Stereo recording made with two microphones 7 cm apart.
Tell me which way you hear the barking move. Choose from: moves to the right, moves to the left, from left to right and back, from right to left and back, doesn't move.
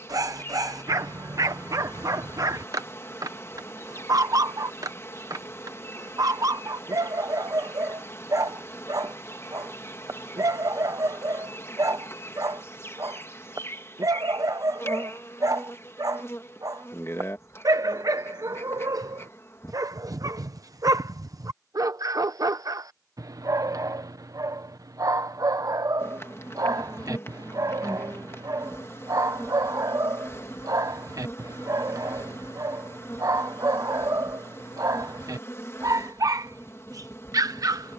doesn't move.